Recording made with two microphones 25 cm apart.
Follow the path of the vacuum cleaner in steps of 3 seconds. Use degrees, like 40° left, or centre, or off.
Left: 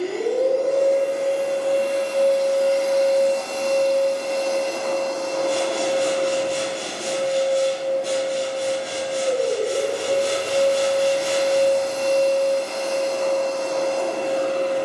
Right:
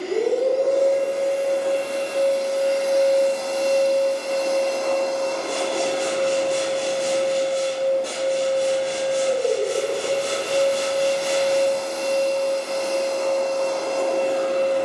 30° right, centre, 10° left, 10° left, 10° left.